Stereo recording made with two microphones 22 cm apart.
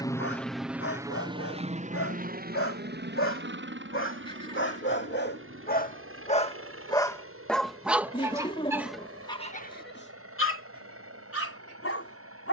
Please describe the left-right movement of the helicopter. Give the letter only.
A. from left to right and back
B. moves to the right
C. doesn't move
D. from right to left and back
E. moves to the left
B.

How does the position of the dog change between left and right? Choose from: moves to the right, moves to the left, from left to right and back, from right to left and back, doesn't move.
from left to right and back.